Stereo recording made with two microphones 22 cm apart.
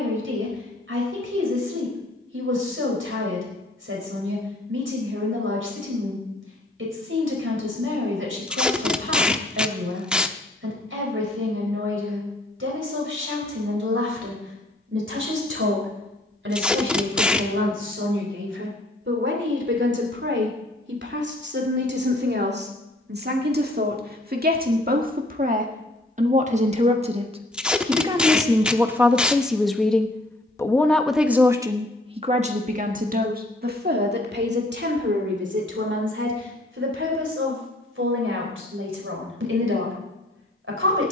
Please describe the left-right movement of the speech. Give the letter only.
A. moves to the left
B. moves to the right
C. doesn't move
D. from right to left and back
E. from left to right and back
D.